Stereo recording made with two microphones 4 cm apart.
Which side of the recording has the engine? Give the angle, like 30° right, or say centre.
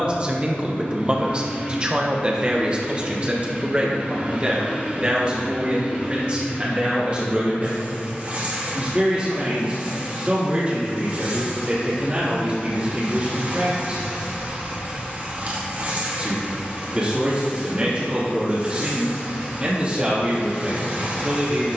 40° right.